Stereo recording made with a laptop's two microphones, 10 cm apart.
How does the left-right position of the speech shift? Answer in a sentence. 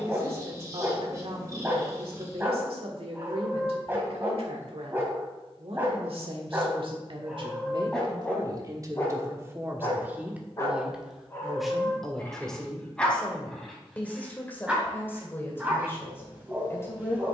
In this clip you hear the speech go from the right side to the left.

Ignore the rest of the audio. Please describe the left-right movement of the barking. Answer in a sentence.
In this clip you hear the barking move from right to left and back again.